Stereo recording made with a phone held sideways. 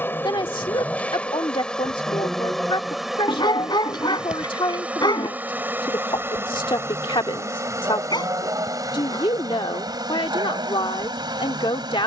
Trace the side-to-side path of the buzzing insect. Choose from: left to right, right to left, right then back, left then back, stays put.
left to right.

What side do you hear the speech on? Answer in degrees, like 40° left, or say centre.
40° left.